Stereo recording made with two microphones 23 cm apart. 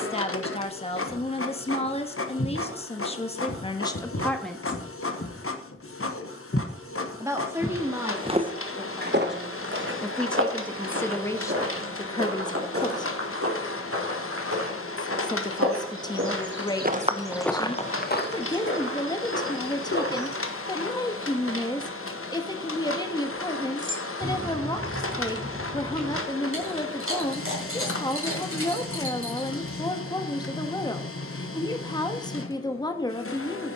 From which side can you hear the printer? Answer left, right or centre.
left.